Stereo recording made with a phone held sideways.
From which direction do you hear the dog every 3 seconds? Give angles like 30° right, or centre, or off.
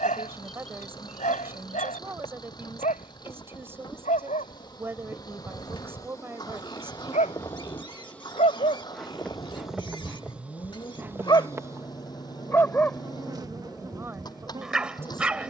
70° left, 70° left, 60° left, 40° left, centre.